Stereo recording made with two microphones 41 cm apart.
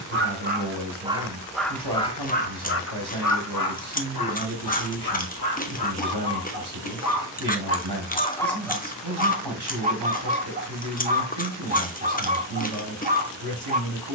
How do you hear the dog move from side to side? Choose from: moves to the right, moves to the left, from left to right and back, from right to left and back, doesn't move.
from right to left and back.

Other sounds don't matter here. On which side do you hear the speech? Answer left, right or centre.
right.